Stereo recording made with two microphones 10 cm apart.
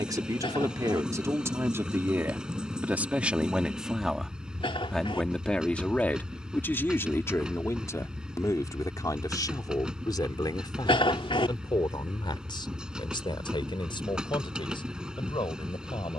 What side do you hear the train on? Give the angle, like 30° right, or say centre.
10° right.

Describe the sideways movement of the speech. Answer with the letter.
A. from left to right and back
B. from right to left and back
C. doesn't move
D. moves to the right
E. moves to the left
E.